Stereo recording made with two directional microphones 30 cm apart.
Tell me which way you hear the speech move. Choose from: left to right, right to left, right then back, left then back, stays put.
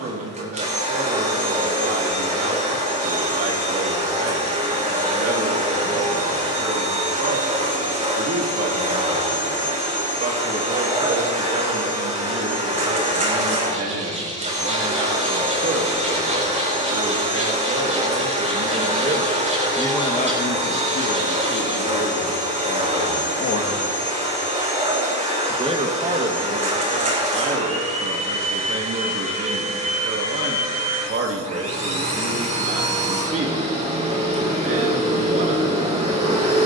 left then back.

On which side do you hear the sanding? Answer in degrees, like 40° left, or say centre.
20° right.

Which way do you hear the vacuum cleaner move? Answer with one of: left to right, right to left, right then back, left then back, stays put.
stays put.